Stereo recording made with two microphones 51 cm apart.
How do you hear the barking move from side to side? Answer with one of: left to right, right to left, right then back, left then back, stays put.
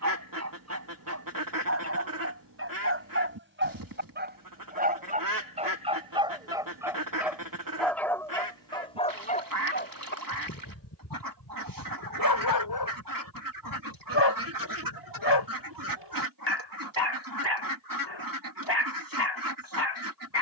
right to left.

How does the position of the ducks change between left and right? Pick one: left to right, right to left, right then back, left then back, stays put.
stays put.